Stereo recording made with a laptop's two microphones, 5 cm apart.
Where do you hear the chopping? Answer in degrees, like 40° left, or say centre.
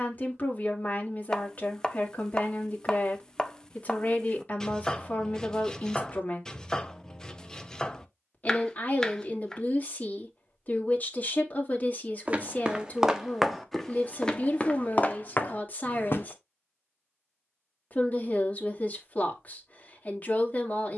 10° left.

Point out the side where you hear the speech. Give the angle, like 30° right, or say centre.
30° left.